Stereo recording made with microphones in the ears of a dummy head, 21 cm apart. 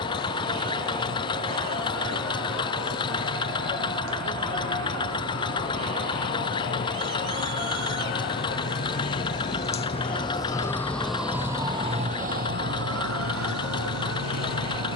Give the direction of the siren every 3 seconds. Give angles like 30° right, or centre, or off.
60° left, 60° left, 50° left, 10° left, 60° right.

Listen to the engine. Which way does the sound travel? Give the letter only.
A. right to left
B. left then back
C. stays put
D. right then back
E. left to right
C.